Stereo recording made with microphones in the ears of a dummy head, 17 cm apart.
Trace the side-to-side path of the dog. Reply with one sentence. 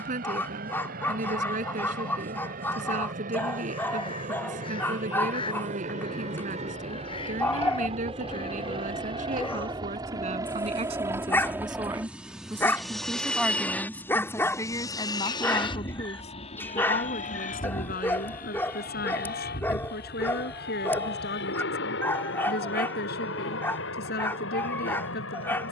In this clip you hear the dog stay in one place.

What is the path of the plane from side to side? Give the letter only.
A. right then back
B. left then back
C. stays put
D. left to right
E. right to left
E.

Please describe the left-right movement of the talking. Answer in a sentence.
In this clip you hear the talking go from the right side to the left.